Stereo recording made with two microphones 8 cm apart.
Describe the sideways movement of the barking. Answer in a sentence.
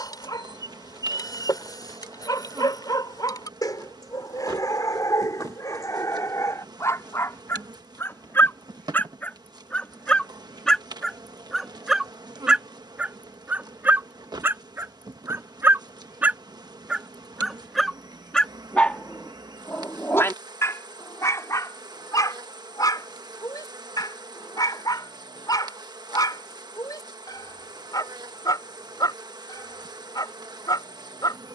You can hear the barking go right and come back.